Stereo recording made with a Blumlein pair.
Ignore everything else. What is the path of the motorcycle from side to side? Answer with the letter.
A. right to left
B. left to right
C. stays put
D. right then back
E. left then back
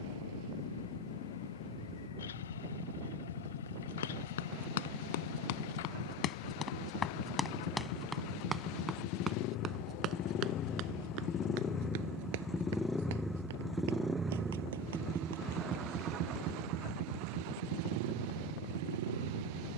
B.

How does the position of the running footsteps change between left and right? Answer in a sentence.
In this clip you hear the running footsteps move to the right.